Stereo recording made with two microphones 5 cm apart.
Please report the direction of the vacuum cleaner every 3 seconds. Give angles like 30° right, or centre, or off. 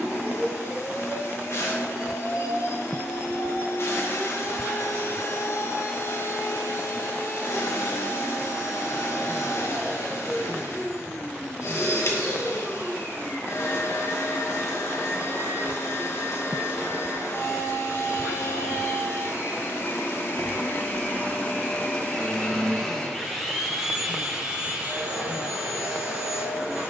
60° left, 60° left, 60° left, 60° left, 60° left, 60° left, 60° left, 20° left, 20° right.